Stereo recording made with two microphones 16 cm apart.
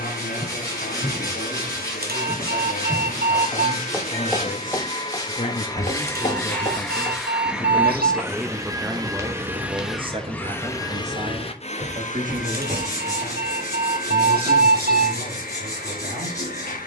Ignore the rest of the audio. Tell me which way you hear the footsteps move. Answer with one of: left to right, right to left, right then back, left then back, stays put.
left then back.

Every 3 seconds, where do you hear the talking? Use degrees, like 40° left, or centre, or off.
70° left, 60° left, 20° left, 40° right, 60° right, 70° right.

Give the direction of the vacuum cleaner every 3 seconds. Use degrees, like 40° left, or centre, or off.
60° left, 40° left, centre, 10° left, 60° left, 60° left.